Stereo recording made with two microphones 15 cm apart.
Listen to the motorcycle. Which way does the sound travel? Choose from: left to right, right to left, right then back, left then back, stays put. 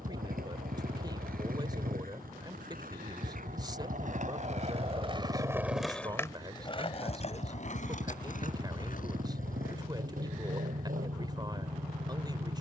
stays put.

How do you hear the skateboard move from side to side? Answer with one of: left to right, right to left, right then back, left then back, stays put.
right to left.